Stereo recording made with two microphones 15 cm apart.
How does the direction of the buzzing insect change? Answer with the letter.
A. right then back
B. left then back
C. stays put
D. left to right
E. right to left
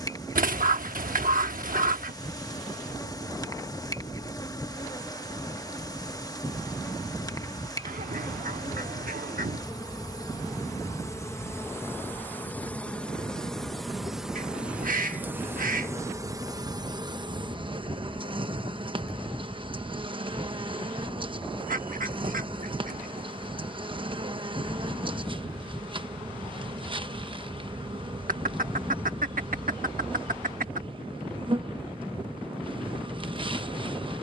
D.